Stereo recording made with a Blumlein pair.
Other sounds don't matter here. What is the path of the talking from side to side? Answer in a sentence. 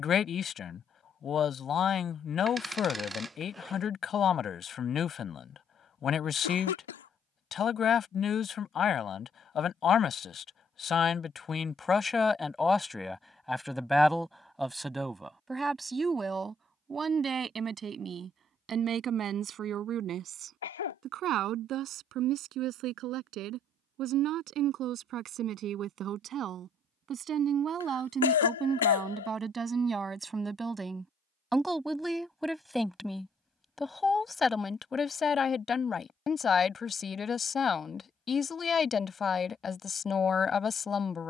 You can hear the talking go right and come back.